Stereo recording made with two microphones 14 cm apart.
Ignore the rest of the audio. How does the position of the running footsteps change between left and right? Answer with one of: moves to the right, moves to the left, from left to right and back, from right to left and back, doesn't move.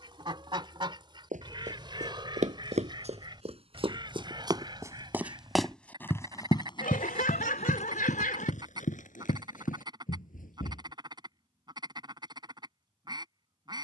moves to the left.